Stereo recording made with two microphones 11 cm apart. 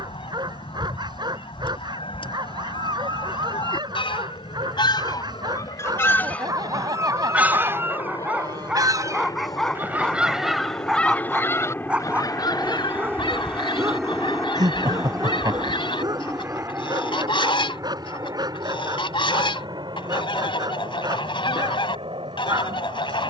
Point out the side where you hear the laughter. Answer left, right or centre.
right.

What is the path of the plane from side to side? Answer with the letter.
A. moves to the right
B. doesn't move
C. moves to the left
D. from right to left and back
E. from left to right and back
A.